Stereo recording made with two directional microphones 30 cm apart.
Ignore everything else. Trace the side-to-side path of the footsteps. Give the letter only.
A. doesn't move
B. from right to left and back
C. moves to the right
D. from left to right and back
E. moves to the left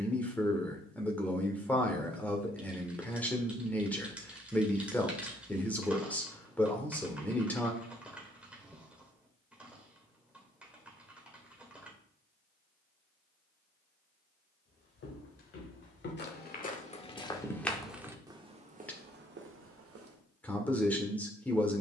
C.